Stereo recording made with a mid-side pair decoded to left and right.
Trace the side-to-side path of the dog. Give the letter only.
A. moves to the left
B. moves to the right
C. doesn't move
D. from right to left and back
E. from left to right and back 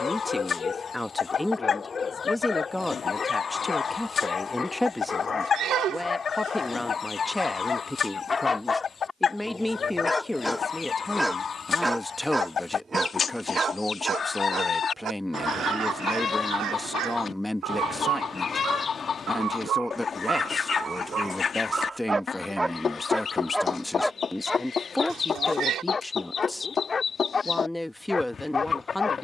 E.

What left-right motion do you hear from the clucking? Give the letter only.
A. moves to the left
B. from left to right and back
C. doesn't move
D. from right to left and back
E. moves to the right
C.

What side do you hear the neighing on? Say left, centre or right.
right.